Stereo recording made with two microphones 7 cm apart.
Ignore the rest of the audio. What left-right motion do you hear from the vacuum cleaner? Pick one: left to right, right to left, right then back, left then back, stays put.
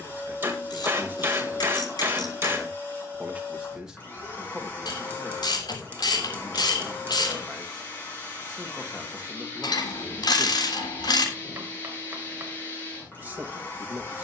stays put.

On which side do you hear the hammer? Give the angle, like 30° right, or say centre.
30° right.